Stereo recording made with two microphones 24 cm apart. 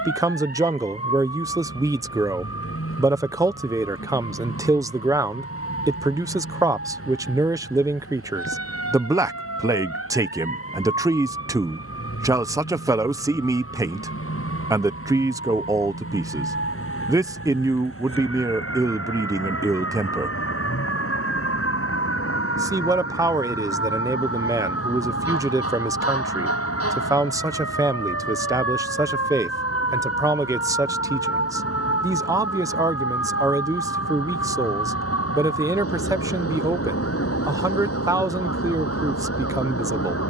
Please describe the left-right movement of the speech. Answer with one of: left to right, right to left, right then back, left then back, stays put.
stays put.